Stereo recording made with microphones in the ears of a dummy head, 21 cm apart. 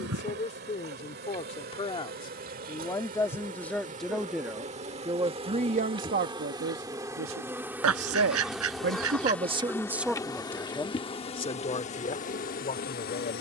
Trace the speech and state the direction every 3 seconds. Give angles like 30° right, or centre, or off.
30° left, 10° right, 60° right, centre, 40° left.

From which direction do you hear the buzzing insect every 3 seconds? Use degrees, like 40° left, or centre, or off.
40° right, 30° right, 10° right, 20° left, 40° left.